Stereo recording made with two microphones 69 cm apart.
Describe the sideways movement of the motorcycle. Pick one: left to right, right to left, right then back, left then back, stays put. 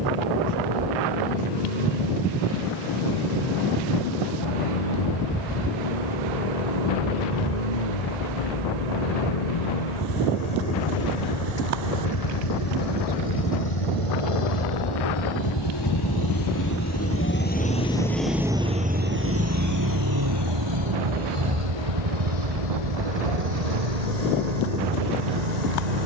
left to right.